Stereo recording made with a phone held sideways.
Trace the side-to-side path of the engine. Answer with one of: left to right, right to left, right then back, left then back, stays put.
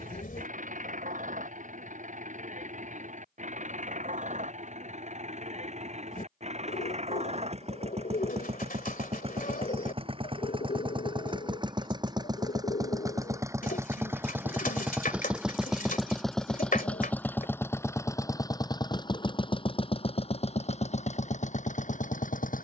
right to left.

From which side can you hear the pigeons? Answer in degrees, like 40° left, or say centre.
60° left.